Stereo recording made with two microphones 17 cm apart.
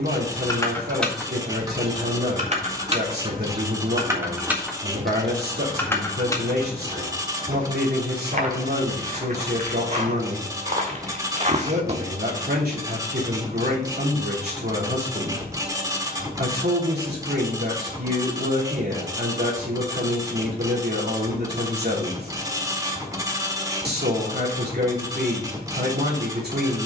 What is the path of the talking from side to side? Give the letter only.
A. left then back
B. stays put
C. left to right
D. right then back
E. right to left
B.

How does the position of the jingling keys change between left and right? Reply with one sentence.
In this clip you hear the jingling keys go right and come back.